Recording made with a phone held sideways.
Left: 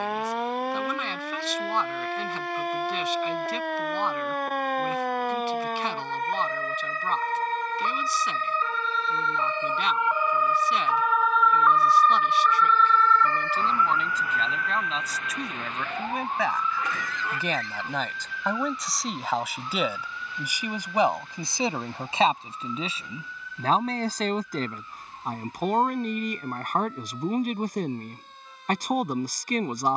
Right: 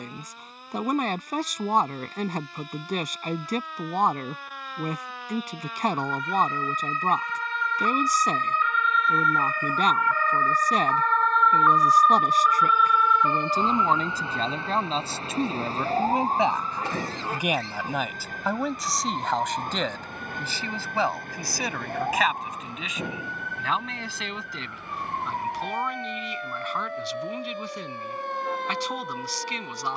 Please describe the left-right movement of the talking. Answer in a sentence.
In this clip you hear the talking move to the left.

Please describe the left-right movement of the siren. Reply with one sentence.
You can hear the siren move to the right.